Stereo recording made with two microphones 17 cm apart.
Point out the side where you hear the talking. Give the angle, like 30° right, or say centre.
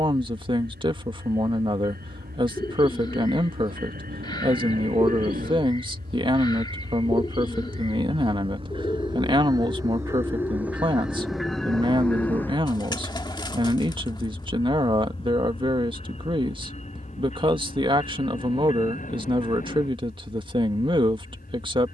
30° right.